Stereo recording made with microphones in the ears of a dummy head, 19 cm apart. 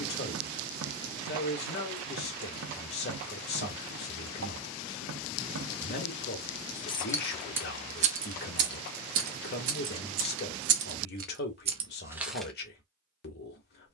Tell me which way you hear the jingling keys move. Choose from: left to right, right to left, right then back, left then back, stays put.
right then back.